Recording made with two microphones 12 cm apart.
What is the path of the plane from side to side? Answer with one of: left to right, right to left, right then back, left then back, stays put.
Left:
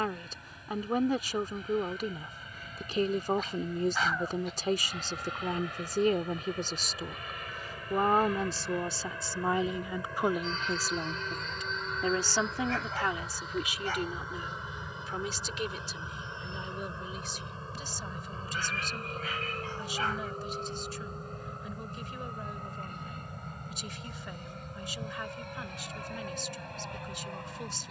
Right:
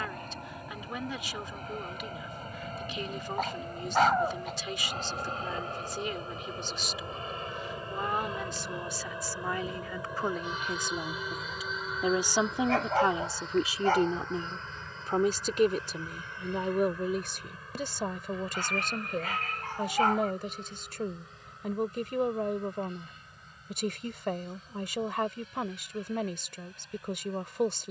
right to left.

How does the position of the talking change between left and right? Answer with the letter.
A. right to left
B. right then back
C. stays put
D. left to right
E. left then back
D.